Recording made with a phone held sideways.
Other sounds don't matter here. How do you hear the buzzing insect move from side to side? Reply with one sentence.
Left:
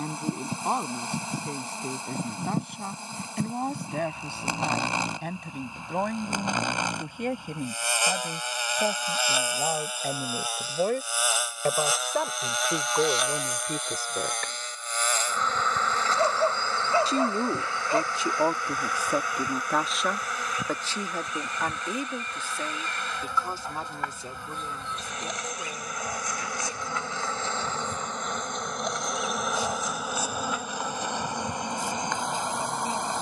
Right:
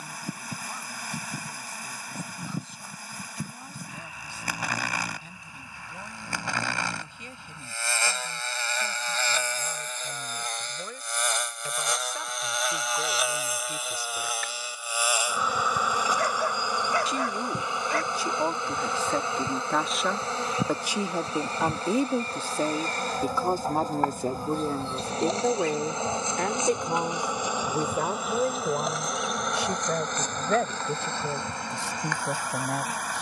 You can hear the buzzing insect go right and come back.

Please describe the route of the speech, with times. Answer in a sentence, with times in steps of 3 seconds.
You can hear the speech on the left from 0 s, in the centre from 18 s and on the right from 21 s.